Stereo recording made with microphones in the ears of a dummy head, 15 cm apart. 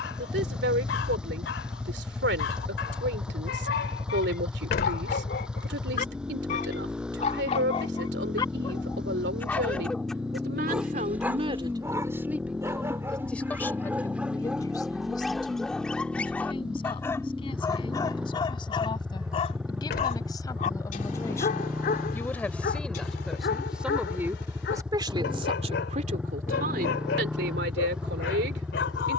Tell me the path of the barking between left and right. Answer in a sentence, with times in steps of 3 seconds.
You can hear the barking on the left from 0 s, in the centre from 9 s and on the left from 18 s.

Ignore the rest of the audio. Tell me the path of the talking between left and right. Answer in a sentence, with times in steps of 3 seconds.
In this clip you hear the talking on the right from 0 s, in the centre from 12 s, on the left from 15 s, in the centre from 21 s and on the right from 24 s.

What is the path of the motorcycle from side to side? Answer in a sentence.
In this clip you hear the motorcycle stay in one place.